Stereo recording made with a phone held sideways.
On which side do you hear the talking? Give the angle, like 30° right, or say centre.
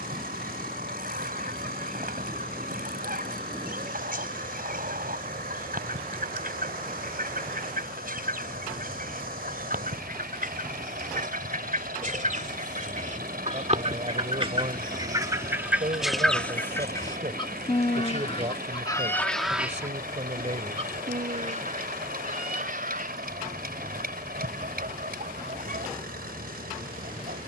50° right.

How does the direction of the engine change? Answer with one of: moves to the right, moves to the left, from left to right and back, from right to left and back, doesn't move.
doesn't move.